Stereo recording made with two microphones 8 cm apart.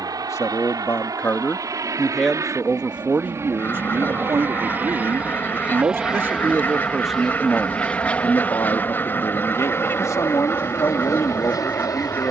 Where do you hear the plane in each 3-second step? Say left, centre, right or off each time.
right, right, centre, left.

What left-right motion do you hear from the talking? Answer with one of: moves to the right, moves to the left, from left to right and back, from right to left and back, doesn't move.
from left to right and back.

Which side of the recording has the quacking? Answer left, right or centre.
left.